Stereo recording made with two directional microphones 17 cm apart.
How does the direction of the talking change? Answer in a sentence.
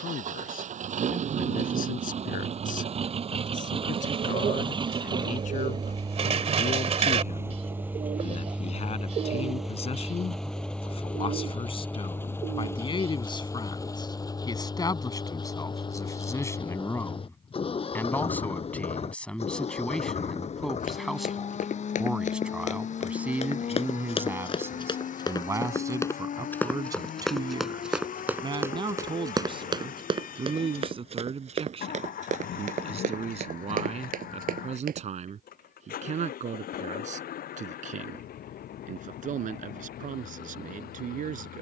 You can hear the talking go from the left side to the right.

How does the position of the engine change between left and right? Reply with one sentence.
In this clip you hear the engine move from right to left.